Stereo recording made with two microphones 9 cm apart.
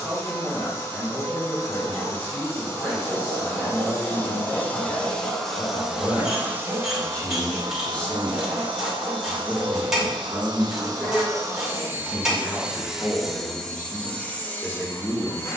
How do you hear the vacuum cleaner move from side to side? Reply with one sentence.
You can hear the vacuum cleaner move from left to right and back again.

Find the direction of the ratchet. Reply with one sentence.
You can hear the ratchet in the centre.